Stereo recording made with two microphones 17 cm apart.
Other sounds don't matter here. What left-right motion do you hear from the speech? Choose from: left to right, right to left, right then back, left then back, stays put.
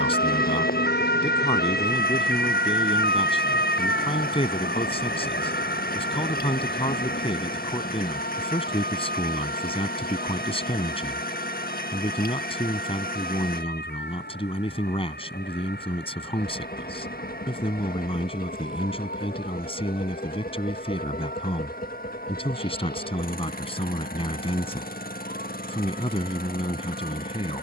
stays put.